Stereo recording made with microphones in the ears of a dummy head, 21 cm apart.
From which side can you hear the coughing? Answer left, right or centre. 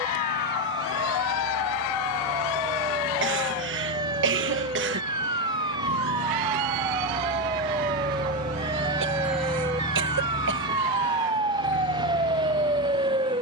right.